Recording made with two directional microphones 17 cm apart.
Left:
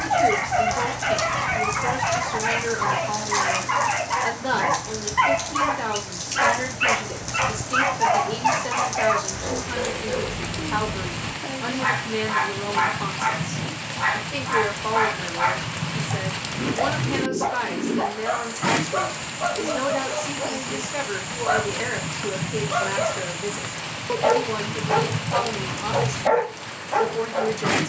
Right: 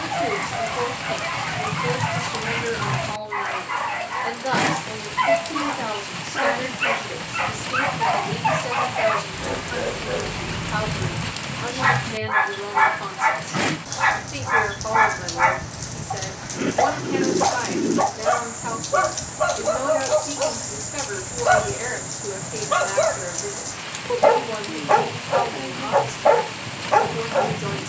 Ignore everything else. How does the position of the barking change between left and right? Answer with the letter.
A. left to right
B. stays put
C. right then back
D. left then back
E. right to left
A.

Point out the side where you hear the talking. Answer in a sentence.
In this clip you hear the talking in the centre.